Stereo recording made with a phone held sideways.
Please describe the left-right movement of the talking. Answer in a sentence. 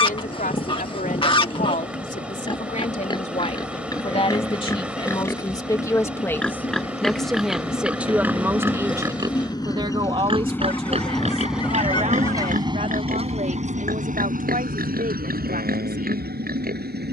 In this clip you hear the talking move to the right.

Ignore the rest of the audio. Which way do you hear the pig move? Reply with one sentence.
In this clip you hear the pig move from left to right.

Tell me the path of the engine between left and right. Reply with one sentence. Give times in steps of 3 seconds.
You can hear the engine on the left from 0 s, in the centre from 9 s and on the right from 12 s.